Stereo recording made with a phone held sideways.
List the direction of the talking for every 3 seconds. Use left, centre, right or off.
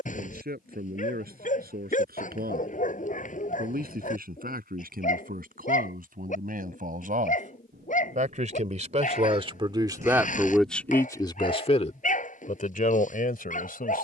right, right, right, centre, left.